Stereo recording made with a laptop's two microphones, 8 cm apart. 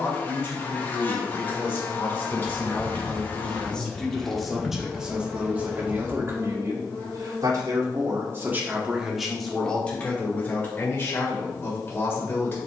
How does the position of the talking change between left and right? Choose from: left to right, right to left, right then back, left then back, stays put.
right then back.